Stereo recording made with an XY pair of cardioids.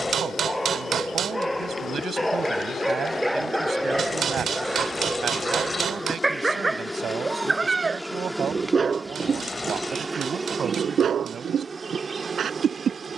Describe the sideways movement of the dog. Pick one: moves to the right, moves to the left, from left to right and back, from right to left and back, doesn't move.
moves to the right.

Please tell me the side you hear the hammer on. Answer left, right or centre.
right.